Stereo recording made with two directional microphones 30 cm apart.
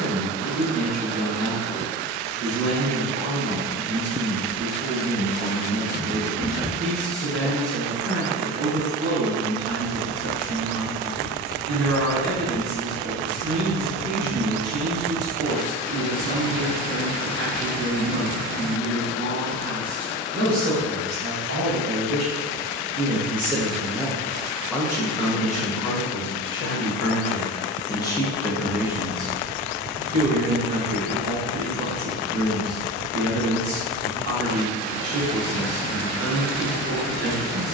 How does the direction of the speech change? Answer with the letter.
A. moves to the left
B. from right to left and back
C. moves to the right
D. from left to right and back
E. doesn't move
B.